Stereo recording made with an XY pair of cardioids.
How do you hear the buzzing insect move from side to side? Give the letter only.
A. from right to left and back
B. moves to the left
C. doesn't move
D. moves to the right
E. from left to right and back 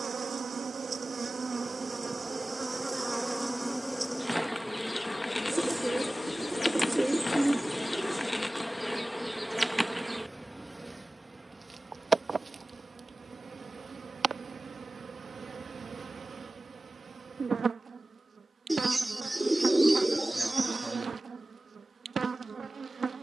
A.